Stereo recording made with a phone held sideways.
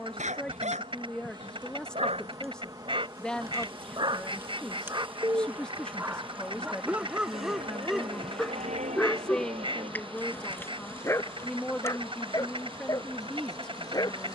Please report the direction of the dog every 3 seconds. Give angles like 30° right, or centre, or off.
50° right, 30° right, 10° right, 10° left, 30° left.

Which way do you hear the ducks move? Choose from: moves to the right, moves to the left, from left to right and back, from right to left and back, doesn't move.
doesn't move.